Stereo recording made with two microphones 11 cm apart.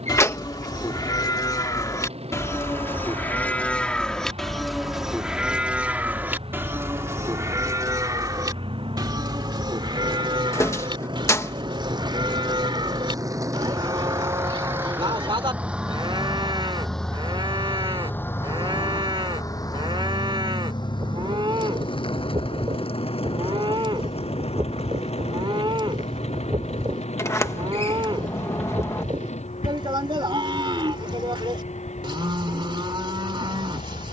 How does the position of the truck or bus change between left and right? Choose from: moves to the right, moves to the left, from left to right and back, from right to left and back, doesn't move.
moves to the left.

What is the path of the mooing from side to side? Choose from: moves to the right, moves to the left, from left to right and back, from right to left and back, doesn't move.
moves to the right.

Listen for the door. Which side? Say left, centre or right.
left.